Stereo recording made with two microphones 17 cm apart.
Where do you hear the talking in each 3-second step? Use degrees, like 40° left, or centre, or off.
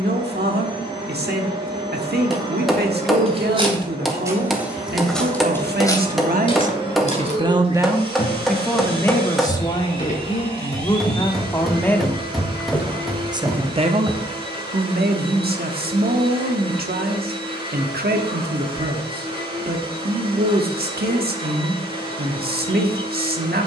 70° right, 70° right, 30° right, 20° left, 40° right, 70° right, 70° right, 70° right.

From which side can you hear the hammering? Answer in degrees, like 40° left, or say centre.
centre.